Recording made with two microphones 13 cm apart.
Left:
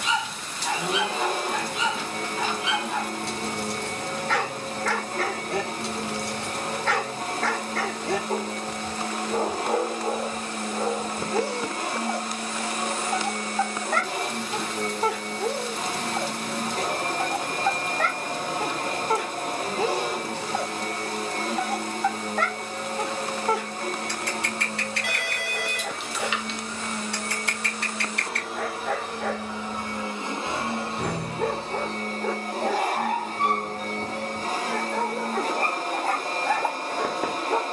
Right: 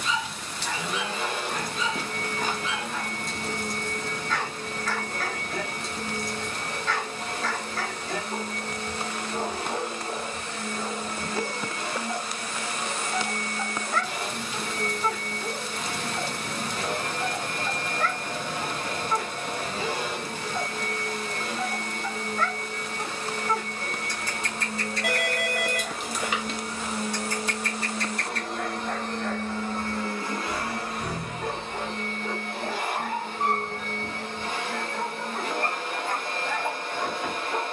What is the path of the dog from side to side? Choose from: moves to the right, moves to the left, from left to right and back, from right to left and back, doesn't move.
doesn't move.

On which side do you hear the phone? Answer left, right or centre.
right.